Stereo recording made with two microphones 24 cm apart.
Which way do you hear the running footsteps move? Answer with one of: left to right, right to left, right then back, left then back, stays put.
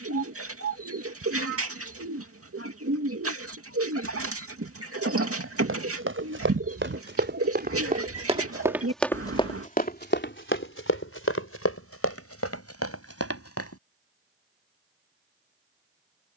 right to left.